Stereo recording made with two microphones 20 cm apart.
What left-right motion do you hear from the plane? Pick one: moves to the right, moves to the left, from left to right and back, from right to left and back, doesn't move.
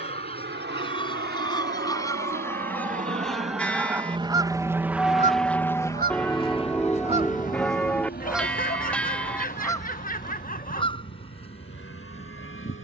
moves to the left.